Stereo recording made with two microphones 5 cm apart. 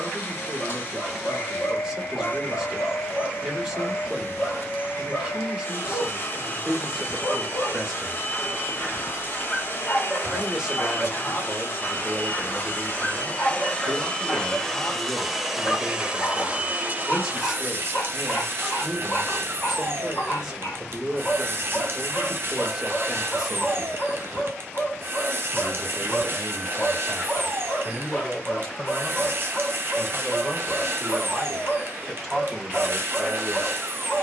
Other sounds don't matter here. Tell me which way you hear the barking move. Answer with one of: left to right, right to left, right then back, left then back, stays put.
stays put.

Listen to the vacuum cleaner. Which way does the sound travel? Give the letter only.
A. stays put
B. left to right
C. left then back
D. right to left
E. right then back
B.